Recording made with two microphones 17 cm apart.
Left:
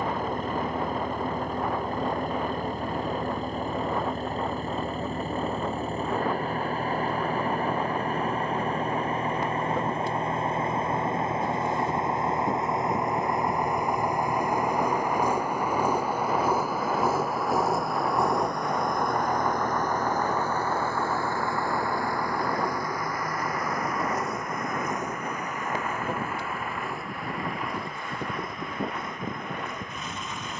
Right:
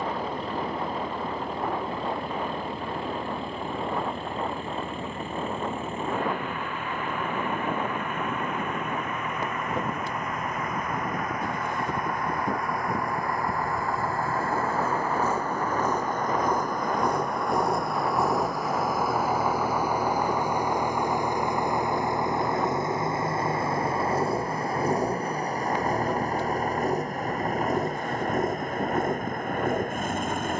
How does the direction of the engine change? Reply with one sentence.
You can hear the engine move from left to right.